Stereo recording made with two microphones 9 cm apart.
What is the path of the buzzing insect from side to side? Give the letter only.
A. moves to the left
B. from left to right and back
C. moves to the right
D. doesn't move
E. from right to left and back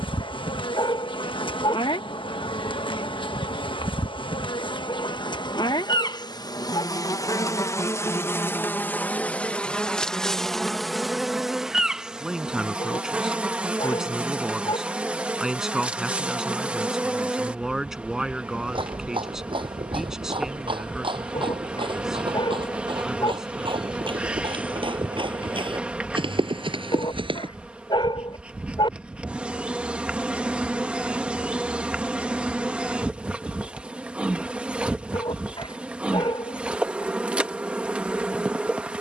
C.